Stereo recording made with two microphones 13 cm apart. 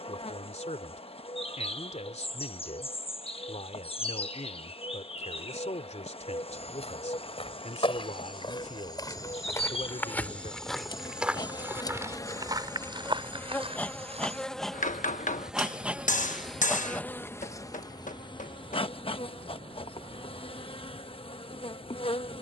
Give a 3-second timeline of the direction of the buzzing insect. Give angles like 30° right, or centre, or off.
40° left, 40° left, 40° left, 40° left, 10° left, 10° left, 40° left, 40° left.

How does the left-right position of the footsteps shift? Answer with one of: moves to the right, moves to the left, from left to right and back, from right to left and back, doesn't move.
moves to the right.